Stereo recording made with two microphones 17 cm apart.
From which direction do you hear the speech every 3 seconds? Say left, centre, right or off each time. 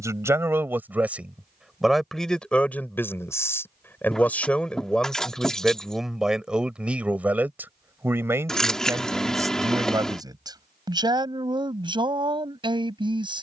centre, centre, centre, right, right.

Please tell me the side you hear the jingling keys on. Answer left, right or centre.
centre.